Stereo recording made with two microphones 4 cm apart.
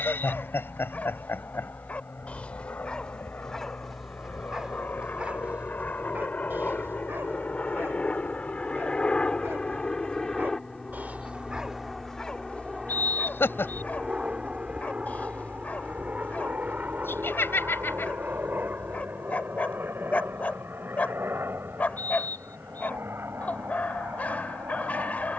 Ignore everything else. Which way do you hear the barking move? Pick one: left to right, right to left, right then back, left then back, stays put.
right then back.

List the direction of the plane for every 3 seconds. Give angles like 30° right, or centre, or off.
60° left, 50° left, 30° left, 10° left, 10° right, 40° right, 50° right, 60° right, 60° right.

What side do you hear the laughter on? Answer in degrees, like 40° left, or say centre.
60° left.